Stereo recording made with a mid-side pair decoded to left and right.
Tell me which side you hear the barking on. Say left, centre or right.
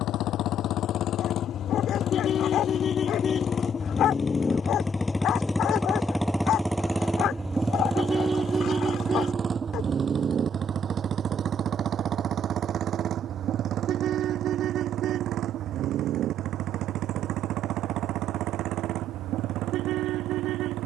left.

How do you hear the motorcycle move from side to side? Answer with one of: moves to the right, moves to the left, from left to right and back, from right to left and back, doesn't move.
moves to the right.